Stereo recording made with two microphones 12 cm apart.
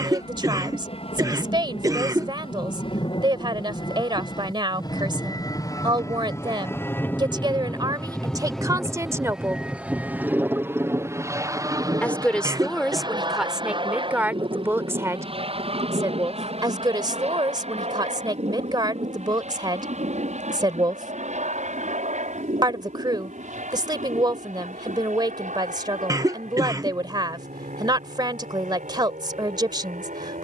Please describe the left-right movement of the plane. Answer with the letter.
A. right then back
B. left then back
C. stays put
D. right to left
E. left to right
E.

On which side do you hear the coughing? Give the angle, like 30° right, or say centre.
30° right.